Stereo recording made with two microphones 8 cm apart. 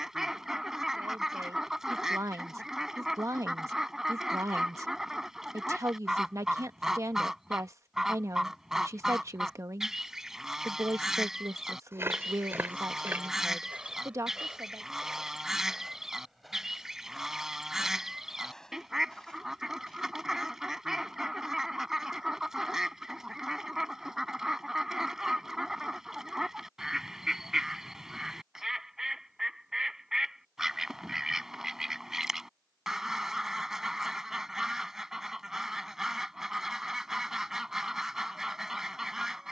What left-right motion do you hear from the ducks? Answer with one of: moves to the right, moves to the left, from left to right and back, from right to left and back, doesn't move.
doesn't move.